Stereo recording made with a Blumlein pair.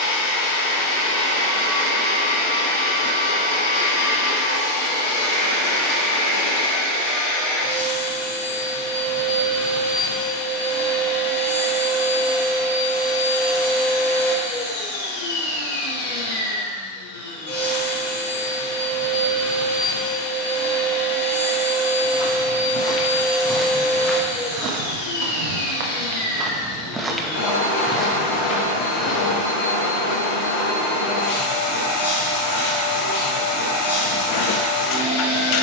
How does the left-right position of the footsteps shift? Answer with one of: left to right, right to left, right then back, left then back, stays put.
right then back.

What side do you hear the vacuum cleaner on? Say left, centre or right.
left.